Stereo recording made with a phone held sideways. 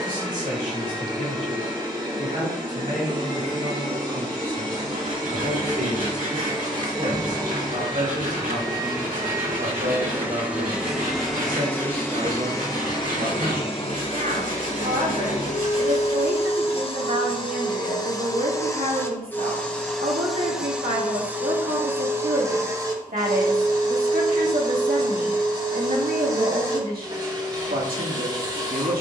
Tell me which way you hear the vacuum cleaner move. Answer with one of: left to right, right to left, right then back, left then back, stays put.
left then back.